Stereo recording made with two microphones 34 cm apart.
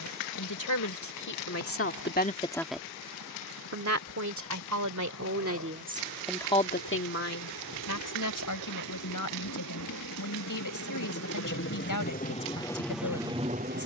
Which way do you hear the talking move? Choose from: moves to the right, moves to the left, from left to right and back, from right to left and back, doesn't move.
from left to right and back.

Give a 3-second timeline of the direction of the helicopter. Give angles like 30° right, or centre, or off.
80° left, 70° left, 70° left, 50° left, centre.